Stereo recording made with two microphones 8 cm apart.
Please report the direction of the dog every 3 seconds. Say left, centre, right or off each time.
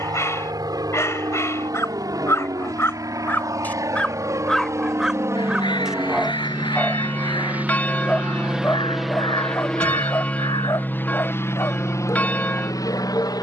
left, centre, centre, left, left.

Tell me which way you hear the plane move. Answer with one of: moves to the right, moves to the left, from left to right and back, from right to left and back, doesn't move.
moves to the left.